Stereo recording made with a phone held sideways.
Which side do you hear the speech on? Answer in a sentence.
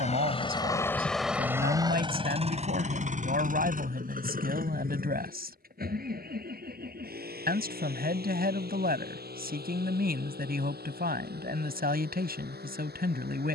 In this clip you hear the speech on the right.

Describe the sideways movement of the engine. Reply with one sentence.
In this clip you hear the engine move from left to right.